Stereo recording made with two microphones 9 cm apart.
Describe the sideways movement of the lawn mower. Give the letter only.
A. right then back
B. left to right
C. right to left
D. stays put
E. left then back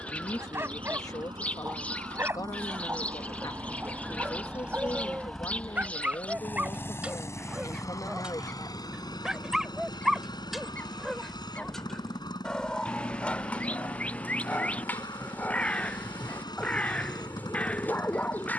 C.